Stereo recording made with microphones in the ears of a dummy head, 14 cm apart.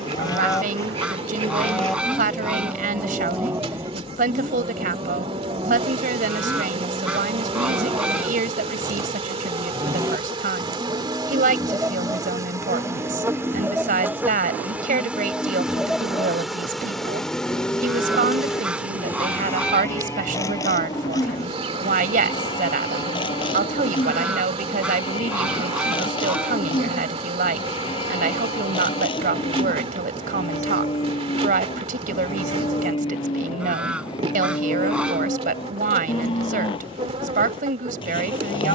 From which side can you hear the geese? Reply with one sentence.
You can hear the geese in the centre.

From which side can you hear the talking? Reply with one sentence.
In this clip you hear the talking on the right.